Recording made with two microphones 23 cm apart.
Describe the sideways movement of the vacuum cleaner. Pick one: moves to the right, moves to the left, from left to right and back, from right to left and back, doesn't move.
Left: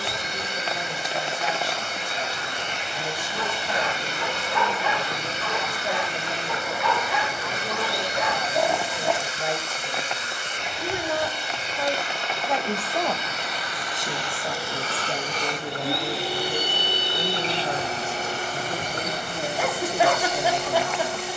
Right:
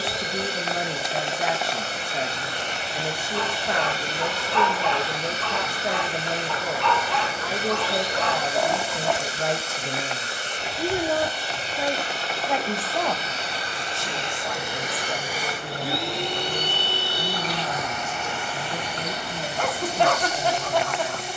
moves to the left.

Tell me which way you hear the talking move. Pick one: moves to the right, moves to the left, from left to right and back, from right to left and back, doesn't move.
moves to the left.